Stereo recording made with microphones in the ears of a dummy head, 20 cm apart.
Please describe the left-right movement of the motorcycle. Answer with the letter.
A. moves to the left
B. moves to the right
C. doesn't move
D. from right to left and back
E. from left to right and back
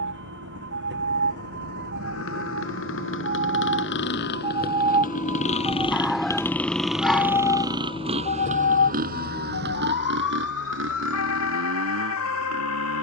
B.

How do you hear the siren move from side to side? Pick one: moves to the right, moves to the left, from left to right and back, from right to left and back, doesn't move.
moves to the left.